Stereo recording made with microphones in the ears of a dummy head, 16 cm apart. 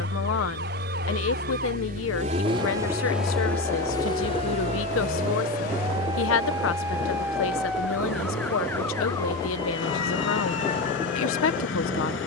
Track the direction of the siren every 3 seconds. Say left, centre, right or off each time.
right, right, centre, left.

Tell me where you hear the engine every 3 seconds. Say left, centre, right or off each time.
right, left, left, left.